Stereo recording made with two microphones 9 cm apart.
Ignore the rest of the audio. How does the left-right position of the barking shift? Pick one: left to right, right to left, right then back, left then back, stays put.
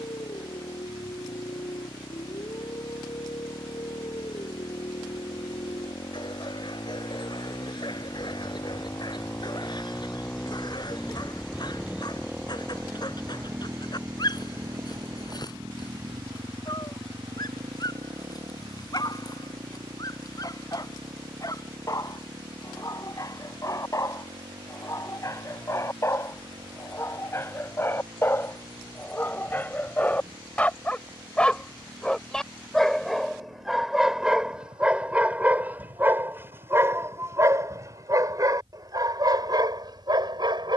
left to right.